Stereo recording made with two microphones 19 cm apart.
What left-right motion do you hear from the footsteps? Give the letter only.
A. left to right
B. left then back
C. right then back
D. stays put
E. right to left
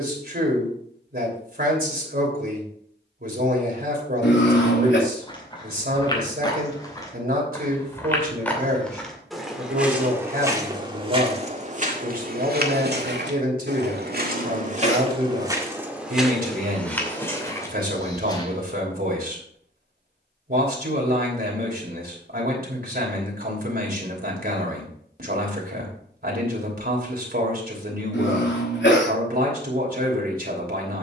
C.